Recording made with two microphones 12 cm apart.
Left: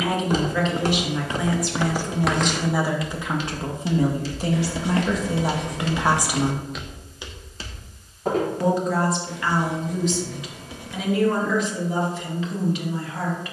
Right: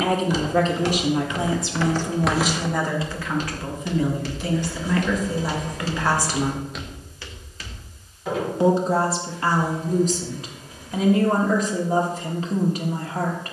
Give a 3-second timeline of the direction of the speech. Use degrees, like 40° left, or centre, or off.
20° right, 30° left, centre, 40° right, 40° right.